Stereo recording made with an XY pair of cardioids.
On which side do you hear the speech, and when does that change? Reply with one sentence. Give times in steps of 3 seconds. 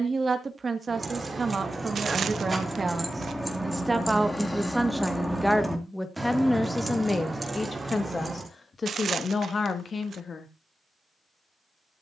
You can hear the speech on the right from 0 s, in the centre from 3 s and on the left from 6 s.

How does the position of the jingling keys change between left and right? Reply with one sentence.
In this clip you hear the jingling keys move from right to left and back again.